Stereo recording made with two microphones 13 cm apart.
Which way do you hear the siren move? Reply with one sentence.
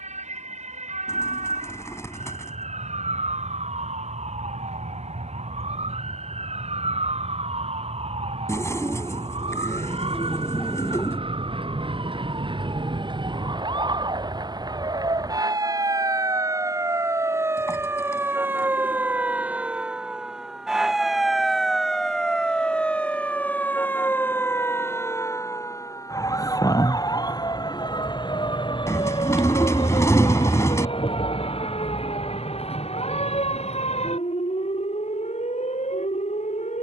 In this clip you hear the siren move to the left.